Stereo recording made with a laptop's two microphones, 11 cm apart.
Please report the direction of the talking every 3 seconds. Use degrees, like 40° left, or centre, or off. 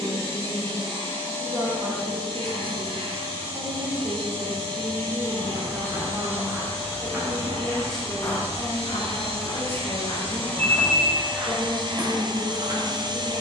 50° right, 30° right, centre, 20° left, 40° left.